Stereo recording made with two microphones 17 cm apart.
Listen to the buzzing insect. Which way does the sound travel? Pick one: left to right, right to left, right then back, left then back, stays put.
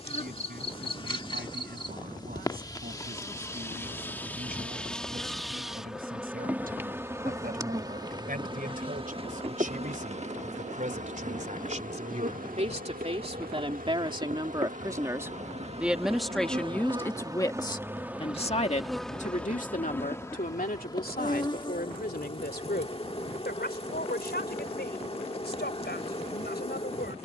right then back.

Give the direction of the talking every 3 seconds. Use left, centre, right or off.
right, right, right, right, right, centre, left, left, left.